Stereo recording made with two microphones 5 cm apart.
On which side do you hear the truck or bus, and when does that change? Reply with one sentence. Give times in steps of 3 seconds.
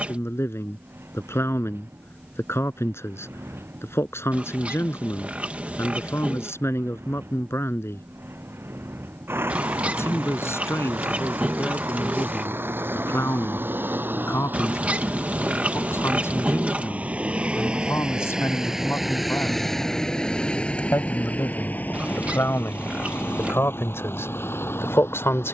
In this clip you hear the truck or bus on the right from 0 s, in the centre from 18 s and on the left from 21 s.